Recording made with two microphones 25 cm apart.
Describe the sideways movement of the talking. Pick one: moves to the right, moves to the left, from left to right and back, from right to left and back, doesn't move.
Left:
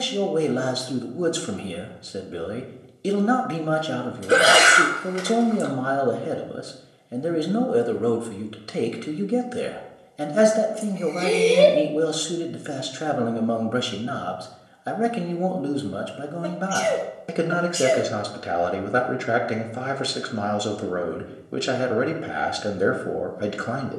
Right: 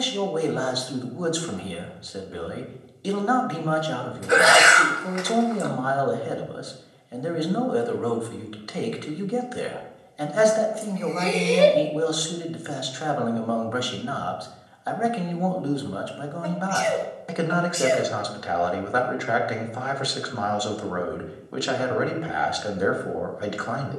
doesn't move.